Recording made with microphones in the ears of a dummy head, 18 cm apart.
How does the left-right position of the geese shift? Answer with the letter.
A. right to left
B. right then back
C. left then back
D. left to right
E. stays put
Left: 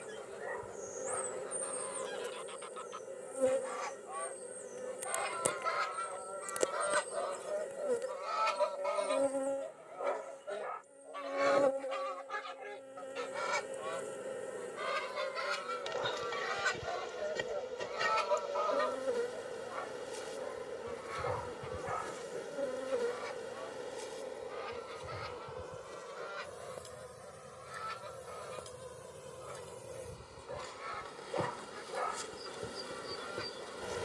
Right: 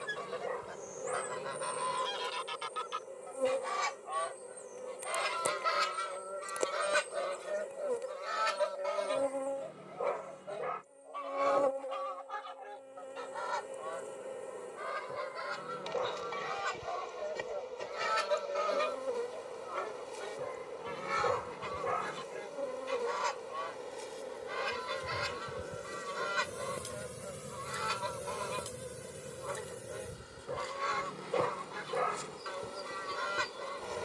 C.